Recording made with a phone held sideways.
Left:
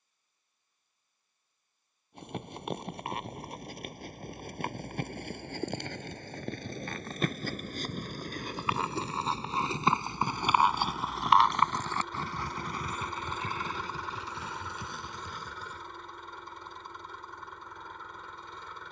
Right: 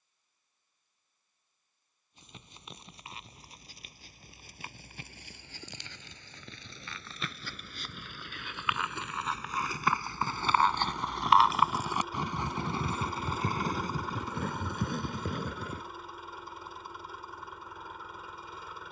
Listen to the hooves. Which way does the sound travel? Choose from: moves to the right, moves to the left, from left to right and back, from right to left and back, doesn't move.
moves to the right.